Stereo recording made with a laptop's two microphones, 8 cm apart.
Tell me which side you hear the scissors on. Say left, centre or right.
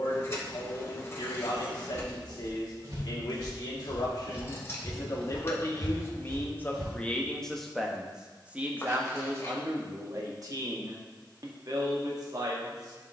left.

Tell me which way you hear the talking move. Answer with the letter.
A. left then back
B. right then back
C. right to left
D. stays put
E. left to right
E.